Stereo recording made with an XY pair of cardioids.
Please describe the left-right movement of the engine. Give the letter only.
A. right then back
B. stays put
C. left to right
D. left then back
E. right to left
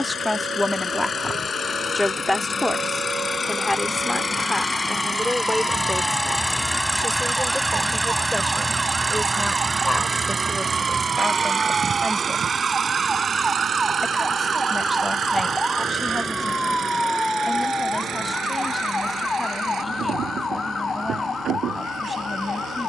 C.